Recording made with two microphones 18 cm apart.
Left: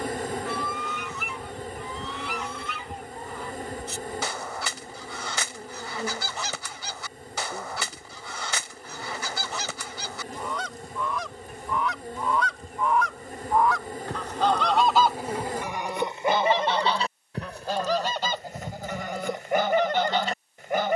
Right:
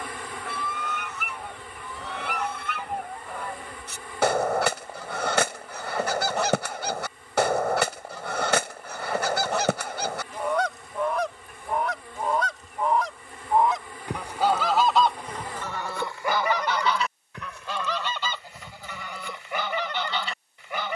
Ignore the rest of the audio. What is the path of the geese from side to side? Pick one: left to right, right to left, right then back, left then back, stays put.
right to left.